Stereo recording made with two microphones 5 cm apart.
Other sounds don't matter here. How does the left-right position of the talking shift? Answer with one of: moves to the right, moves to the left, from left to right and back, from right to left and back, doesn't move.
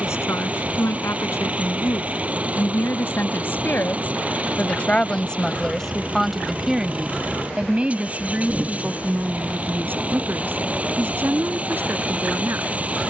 moves to the right.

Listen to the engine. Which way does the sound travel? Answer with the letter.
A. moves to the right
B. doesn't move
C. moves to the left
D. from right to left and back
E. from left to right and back
B.